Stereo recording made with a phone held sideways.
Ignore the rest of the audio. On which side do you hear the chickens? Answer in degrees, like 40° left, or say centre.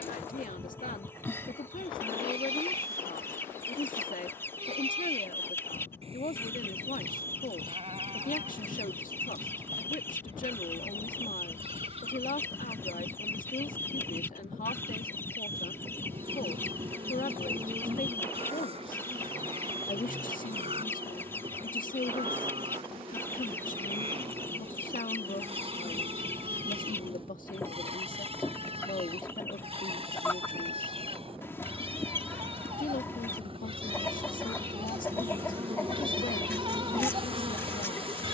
10° left.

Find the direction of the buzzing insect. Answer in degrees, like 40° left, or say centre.
30° right.